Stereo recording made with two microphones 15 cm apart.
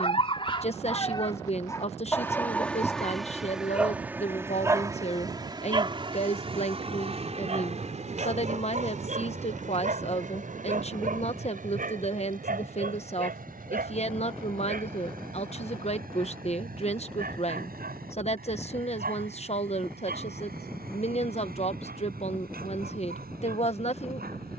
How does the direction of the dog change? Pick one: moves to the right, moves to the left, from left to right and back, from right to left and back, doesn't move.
moves to the right.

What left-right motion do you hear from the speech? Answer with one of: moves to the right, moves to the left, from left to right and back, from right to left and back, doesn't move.
doesn't move.